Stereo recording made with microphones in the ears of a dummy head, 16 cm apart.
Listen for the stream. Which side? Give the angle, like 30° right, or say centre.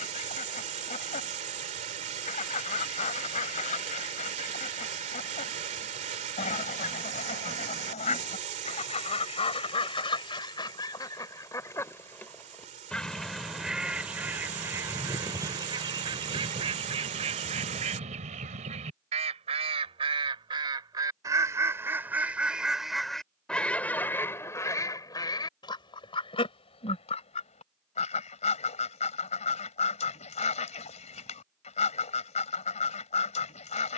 40° right.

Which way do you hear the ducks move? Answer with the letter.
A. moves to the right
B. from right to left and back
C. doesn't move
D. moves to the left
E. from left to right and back
E.